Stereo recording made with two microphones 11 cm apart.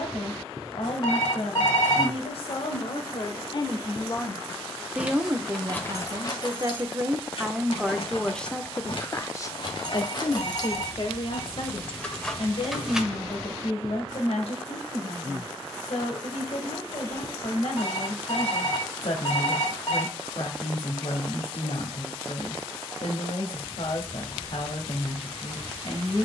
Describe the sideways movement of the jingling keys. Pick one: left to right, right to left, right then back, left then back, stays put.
left then back.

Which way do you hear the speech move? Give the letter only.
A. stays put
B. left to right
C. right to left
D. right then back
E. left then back
D.